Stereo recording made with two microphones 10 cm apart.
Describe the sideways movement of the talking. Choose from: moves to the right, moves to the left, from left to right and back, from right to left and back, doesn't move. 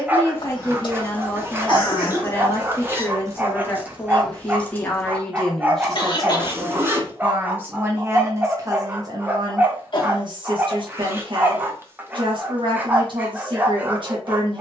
moves to the right.